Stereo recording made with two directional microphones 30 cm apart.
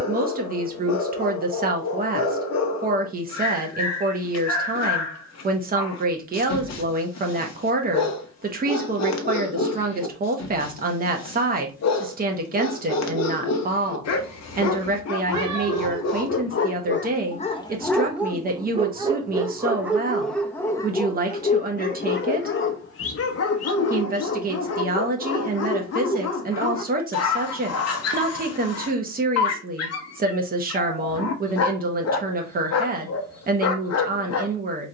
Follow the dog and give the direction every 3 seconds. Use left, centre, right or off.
left, left, left, left, left, left, centre, left, left, left, left, left.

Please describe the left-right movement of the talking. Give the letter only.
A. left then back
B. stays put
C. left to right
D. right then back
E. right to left
B.